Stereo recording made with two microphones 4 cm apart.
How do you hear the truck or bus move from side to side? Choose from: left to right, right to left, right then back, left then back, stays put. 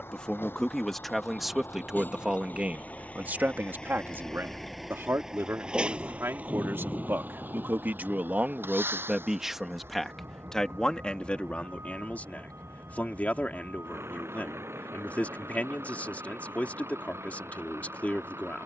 left to right.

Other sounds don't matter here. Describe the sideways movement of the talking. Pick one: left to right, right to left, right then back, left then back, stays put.
right then back.